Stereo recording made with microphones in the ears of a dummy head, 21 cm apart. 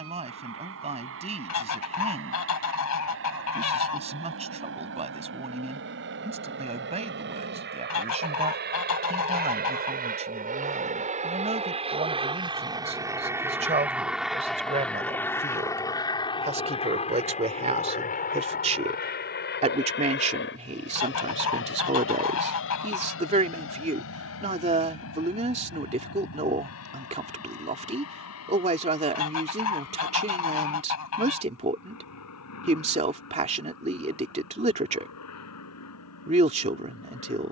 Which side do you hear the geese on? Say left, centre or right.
left.